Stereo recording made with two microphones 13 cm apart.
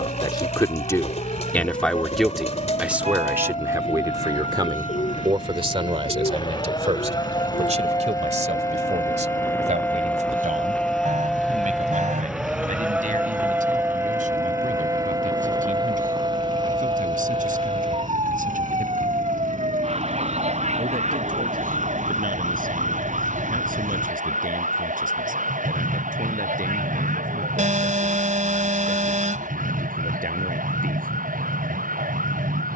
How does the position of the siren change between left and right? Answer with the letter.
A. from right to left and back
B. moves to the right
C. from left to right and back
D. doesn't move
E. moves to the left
B.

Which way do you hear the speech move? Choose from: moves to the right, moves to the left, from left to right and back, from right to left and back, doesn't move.
moves to the right.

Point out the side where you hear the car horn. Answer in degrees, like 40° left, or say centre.
60° right.